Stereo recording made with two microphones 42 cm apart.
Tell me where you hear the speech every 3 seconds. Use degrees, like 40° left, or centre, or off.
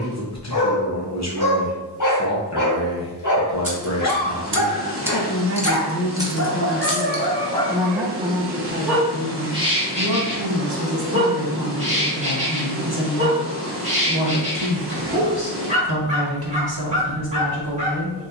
40° left, 40° left, 10° left, 50° right, 60° right, 60° right.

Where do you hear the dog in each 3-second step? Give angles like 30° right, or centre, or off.
50° left, 50° left, 20° left, 10° right, 20° right, 20° right.